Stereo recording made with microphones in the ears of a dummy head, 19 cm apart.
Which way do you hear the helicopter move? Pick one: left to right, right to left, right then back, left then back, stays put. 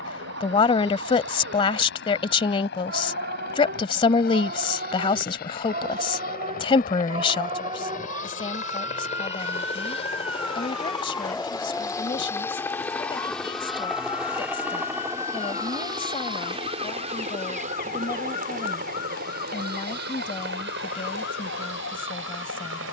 left to right.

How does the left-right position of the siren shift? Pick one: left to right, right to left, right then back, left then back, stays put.
right to left.